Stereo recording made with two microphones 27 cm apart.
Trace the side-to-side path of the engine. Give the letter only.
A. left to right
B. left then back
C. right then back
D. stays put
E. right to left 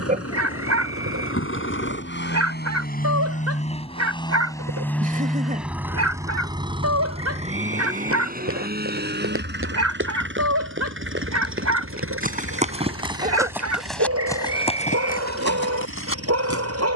A.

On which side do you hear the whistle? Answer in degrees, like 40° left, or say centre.
10° right.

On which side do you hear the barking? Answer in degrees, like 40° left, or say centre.
70° right.